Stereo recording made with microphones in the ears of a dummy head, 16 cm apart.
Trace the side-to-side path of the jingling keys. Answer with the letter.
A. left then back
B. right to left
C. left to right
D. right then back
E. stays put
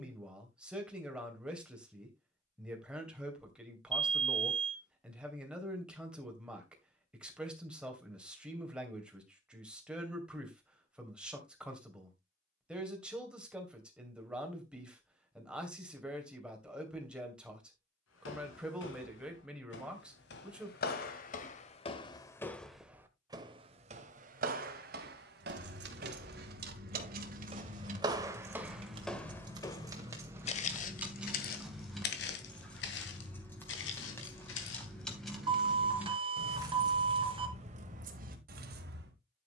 A.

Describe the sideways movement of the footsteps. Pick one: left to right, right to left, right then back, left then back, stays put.
right then back.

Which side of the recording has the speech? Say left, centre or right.
centre.